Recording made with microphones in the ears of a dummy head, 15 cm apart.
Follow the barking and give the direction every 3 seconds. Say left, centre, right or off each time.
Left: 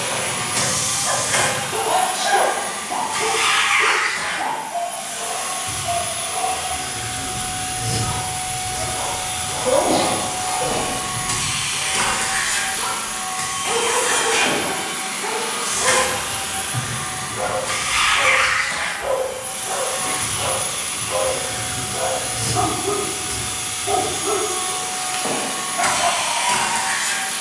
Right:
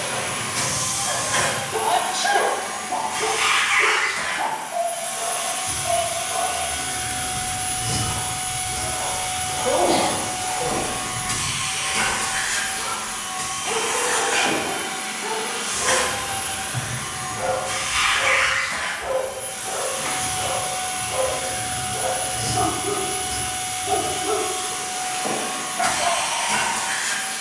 left, right, centre, left, left, left, left, left, left.